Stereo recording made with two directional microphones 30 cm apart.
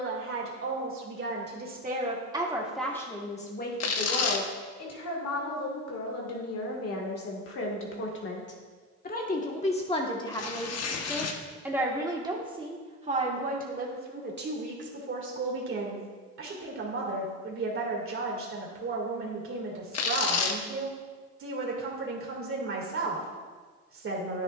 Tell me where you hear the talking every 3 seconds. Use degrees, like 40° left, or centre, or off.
30° right, 40° left, 50° left, 10° left, 30° right, 40° right, 50° right, 50° right.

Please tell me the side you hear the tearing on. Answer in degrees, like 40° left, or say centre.
60° left.